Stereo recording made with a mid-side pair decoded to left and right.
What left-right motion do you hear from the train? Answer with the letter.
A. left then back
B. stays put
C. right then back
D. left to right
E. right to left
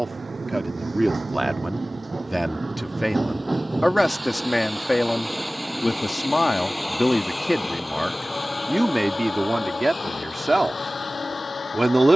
E.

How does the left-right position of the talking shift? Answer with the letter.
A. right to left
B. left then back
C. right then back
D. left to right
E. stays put
B.